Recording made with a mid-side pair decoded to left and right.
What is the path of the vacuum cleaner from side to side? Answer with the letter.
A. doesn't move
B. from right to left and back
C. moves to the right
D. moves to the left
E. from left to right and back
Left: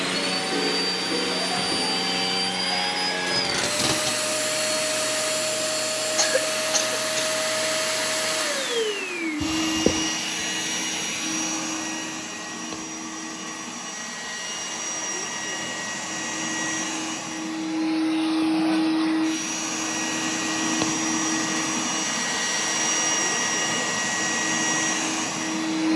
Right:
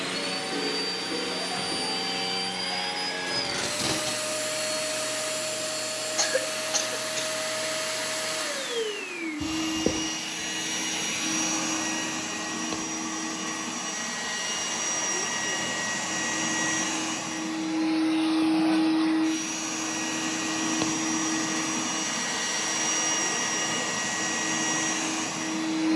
E.